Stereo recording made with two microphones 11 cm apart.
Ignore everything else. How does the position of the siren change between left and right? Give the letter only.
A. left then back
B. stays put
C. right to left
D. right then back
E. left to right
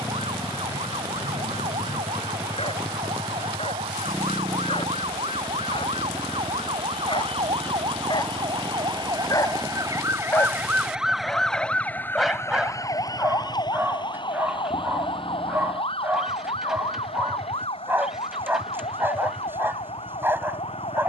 C.